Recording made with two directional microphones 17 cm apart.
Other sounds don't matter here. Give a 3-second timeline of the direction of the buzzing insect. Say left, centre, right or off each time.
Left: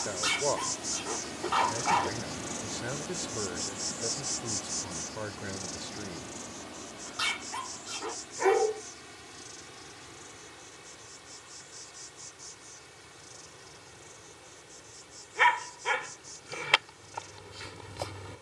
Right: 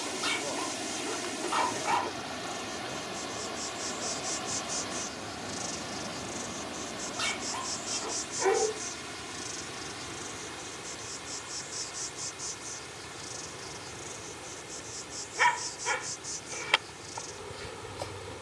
left, centre, right, right, right, right.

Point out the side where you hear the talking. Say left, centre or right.
left.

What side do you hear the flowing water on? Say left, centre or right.
right.